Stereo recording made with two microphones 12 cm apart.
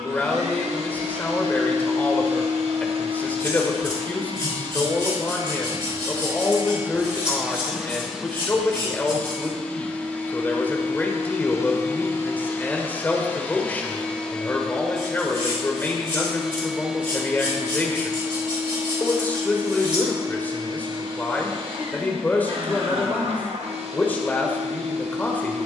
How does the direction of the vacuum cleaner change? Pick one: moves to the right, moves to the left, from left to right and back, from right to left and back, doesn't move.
from right to left and back.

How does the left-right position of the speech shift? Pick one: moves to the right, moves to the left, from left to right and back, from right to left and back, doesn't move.
doesn't move.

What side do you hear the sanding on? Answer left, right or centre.
right.